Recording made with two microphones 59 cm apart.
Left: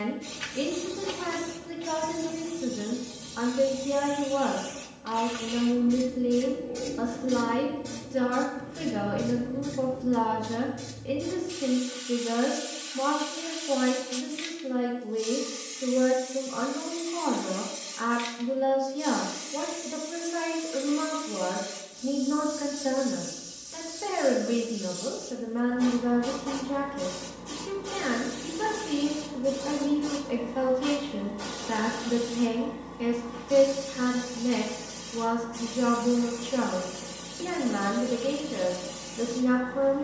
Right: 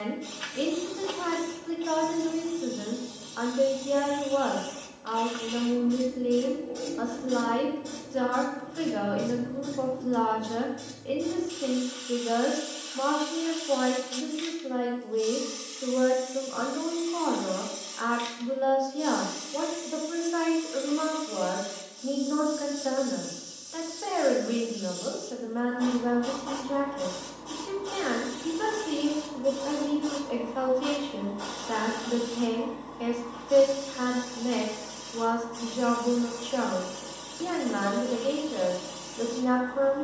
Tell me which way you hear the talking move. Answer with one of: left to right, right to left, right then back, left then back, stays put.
stays put.